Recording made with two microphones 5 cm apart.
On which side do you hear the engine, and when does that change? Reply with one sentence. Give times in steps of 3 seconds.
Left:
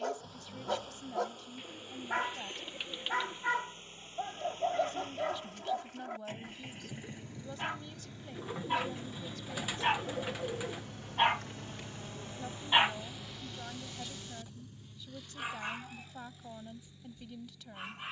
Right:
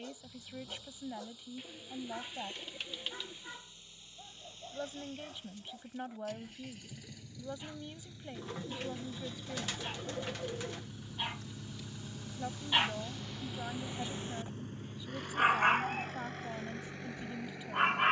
You can hear the engine on the left from 0 s, in the centre from 9 s and on the right from 12 s.